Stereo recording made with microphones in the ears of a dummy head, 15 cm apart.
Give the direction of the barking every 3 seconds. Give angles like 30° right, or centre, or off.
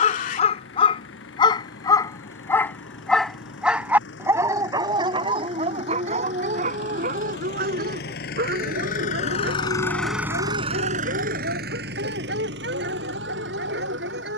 30° left, 20° right, 60° right, 70° right, 70° right.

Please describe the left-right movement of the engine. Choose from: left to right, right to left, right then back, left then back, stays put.
left to right.